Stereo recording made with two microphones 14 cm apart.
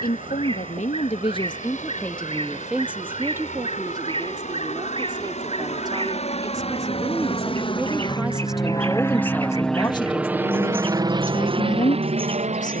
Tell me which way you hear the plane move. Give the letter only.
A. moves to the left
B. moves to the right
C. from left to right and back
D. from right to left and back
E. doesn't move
B.